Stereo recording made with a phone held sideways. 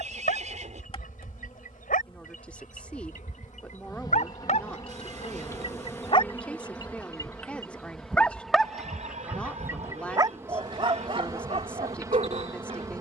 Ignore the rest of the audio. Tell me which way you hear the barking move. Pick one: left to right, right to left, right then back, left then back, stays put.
left to right.